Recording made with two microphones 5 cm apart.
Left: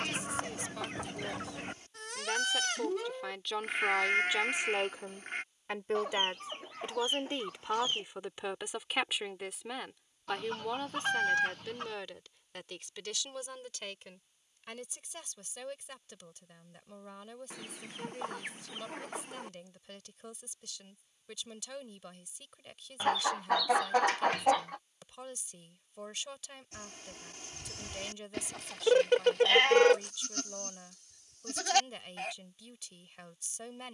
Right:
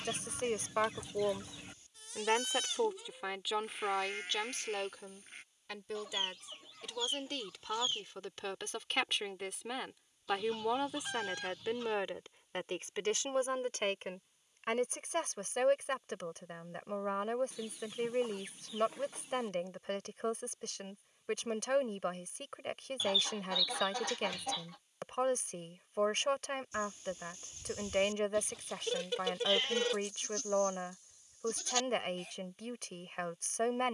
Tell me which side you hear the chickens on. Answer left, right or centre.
left.